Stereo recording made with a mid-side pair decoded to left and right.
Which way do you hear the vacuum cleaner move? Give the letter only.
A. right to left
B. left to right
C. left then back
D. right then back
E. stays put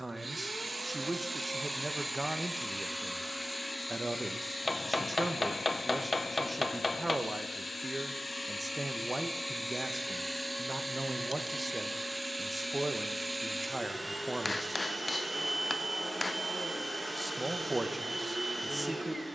C.